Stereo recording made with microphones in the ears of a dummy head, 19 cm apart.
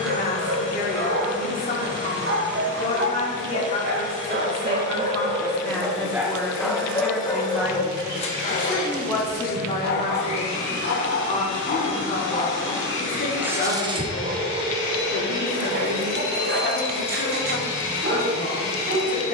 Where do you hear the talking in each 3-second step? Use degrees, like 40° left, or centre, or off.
40° left, 20° left, centre, 30° left, 40° left, 40° left, 40° left.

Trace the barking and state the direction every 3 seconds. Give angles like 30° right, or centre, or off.
50° right, 40° right, 20° left, 50° left, 10° right, 50° right, 50° right.